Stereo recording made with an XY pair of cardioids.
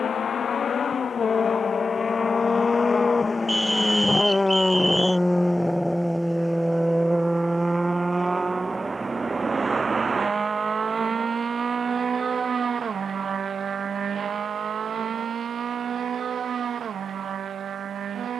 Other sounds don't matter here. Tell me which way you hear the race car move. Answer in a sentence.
In this clip you hear the race car move to the right.